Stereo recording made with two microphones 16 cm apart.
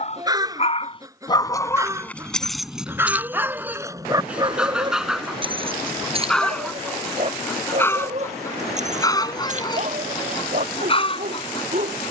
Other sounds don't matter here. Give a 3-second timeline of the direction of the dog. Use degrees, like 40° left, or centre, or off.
20° left, 20° right, 40° right, 50° right.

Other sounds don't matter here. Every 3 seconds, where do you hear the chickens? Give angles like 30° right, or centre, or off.
20° right, 10° right, 10° left, 30° left.